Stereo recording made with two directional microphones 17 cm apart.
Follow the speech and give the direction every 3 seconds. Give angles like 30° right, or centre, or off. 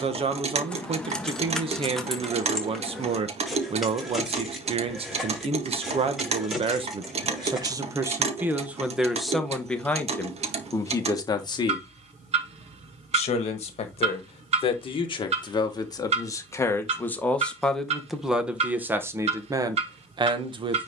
30° right, 30° right, 20° right, 10° left, 40° left, 20° left, 20° right.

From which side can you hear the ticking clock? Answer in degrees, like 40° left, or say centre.
40° right.